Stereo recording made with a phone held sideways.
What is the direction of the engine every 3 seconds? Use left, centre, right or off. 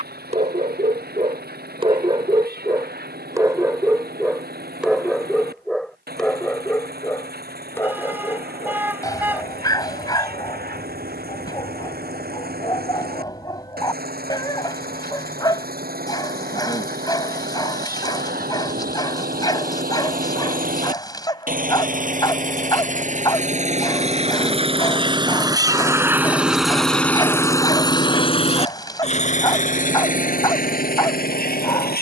right, right, right, right, right, right, right, right, right, left, left.